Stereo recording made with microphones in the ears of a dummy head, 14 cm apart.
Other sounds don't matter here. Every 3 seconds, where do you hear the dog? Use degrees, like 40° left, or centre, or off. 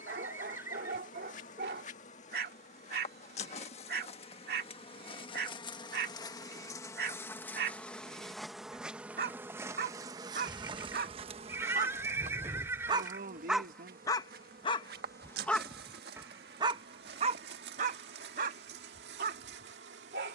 70° right, 70° right, 70° right, 60° right, centre, 20° right, 60° right.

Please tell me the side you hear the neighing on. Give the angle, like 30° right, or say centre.
20° right.